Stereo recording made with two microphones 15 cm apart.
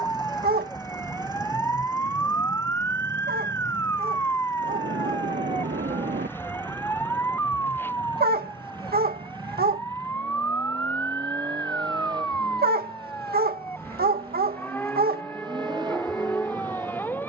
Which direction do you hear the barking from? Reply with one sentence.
You can hear the barking on the right.